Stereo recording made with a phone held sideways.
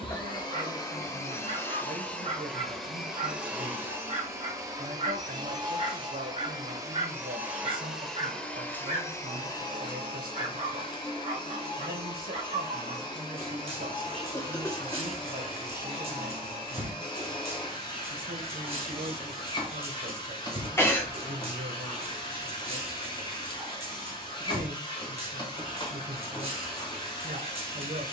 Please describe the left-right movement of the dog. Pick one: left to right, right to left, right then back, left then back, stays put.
stays put.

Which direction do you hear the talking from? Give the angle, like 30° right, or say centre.
60° right.